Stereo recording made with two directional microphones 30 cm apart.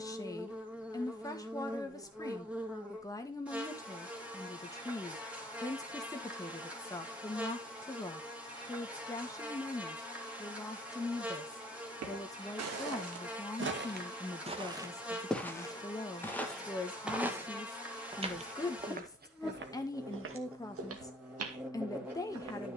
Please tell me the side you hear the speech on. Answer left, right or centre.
centre.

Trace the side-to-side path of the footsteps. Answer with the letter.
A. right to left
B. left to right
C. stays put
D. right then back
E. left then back
E.